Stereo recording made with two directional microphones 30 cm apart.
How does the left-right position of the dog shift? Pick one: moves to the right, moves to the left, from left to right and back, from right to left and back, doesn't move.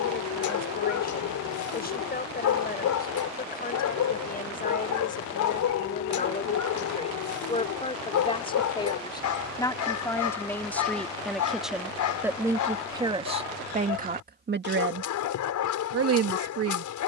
doesn't move.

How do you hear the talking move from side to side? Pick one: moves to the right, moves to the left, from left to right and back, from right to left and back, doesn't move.
moves to the right.